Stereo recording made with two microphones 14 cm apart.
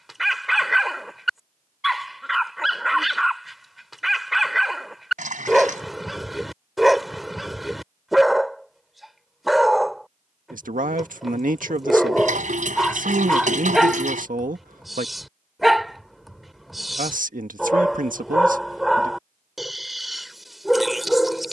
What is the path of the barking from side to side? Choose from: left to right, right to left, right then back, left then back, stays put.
stays put.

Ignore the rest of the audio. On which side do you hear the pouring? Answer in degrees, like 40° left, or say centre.
60° right.